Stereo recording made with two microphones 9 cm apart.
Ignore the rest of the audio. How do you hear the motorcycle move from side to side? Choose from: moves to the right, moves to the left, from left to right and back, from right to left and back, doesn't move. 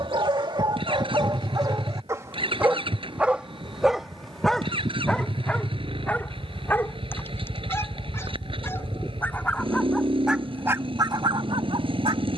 doesn't move.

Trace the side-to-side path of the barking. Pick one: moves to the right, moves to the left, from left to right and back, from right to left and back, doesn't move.
from right to left and back.